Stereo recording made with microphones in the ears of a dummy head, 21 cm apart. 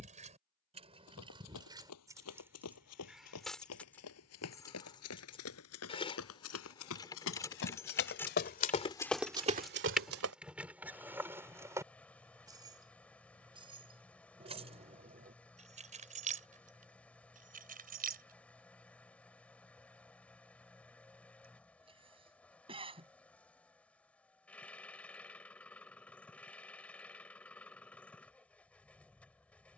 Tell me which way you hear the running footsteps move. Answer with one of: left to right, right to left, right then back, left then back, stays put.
left to right.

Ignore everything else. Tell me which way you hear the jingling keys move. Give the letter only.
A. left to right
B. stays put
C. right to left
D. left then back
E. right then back
D.